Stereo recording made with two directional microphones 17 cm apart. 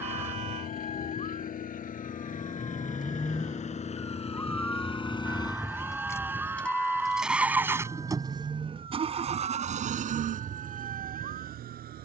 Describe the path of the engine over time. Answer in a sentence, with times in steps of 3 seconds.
In this clip you hear the engine on the left from 0 s, in the centre from 6 s and on the right from 9 s.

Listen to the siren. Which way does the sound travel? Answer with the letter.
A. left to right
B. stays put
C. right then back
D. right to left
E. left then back
A.